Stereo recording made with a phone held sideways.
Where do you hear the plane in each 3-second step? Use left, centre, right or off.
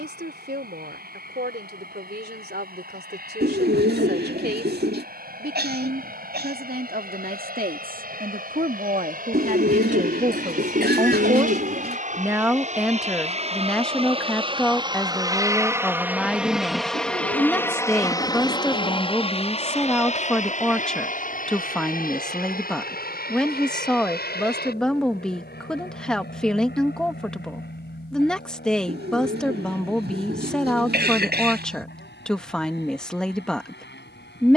right, right, right, right, right, centre, left, left, left, left, left, left.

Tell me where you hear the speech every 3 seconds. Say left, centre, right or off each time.
right, right, right, right, centre, centre, centre, centre, centre, centre, centre, centre.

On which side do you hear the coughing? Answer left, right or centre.
right.